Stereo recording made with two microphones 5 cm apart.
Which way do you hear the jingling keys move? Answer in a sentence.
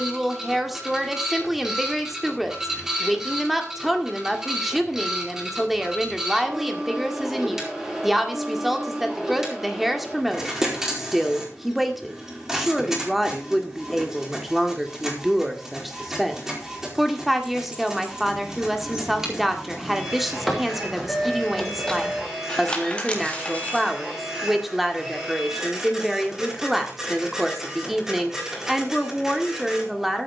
In this clip you hear the jingling keys move from right to left.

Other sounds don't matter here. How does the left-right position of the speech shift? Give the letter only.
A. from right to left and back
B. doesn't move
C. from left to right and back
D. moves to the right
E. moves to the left
B.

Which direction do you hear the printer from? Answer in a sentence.
In this clip you hear the printer in the centre.